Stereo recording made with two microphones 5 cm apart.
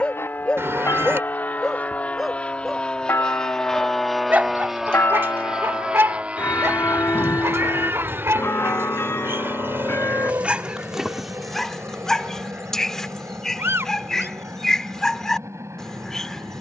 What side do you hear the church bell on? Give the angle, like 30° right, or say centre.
60° left.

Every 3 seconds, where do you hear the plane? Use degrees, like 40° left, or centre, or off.
40° left, centre, 30° right, 50° right, 60° right, 70° right.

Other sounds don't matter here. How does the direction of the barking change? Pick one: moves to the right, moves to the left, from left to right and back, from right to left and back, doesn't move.
from left to right and back.